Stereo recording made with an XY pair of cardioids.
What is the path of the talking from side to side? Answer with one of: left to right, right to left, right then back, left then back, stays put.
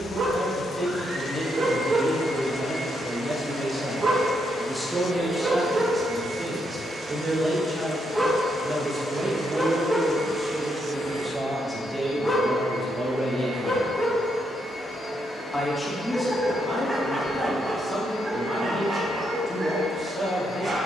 right then back.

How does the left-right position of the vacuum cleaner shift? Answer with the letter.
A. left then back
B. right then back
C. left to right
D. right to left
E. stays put
D.